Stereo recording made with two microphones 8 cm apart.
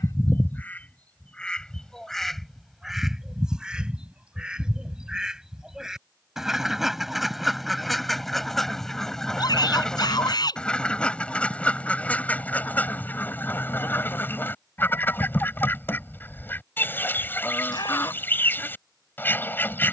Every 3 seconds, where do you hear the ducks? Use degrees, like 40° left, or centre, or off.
10° left, 10° right, centre, 10° left, 20° left, 30° left, 30° left.